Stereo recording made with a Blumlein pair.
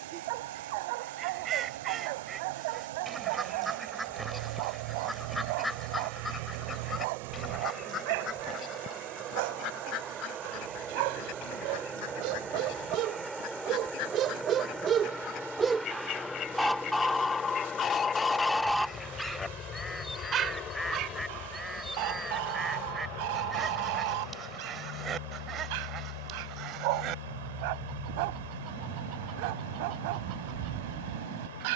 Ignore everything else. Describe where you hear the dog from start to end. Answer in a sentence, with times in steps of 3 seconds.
You can hear the dog on the right from 0 s, in the centre from 15 s and on the right from 21 s.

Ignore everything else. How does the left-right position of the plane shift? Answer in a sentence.
In this clip you hear the plane move to the left.